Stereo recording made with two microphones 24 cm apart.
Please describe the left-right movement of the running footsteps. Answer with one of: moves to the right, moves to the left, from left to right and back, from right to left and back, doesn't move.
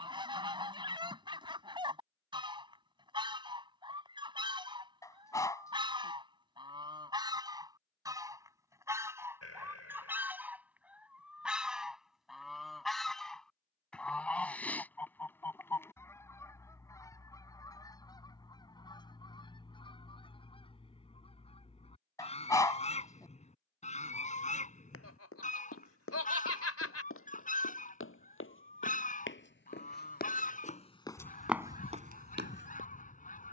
moves to the right.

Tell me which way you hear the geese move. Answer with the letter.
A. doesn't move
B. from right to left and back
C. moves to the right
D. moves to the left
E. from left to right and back
D.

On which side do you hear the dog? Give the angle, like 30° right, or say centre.
10° left.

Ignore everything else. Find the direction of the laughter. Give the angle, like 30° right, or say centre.
80° left.